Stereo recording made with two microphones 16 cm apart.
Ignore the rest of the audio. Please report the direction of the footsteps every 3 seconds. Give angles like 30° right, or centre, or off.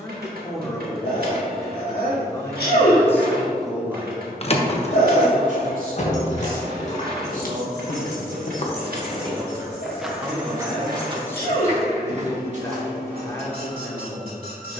off, off, 60° left, 10° right, 50° right.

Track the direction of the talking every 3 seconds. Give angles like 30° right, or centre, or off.
20° left, 20° right, 50° right, centre, 20° left.